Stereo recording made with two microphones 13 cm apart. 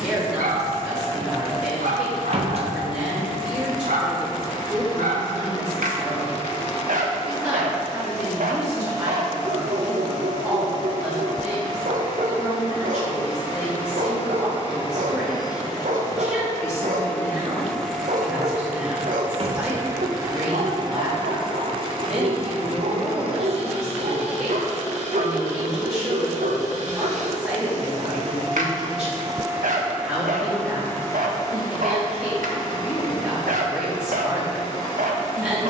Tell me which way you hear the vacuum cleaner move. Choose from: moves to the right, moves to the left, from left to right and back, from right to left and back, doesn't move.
from left to right and back.